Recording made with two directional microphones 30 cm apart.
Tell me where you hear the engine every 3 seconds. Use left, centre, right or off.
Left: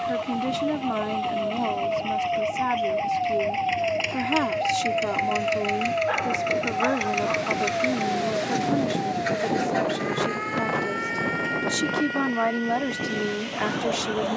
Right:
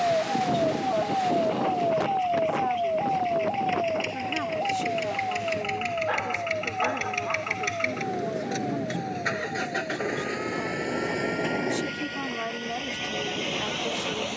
left, left, centre, right, right.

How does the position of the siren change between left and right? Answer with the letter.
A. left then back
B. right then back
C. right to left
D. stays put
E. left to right
C.